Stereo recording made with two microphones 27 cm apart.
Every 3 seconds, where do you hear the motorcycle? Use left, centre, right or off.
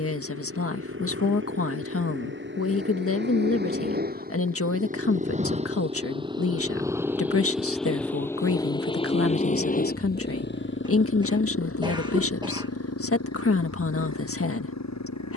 right, right, centre, left, left.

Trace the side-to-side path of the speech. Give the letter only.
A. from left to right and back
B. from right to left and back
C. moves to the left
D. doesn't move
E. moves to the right
D.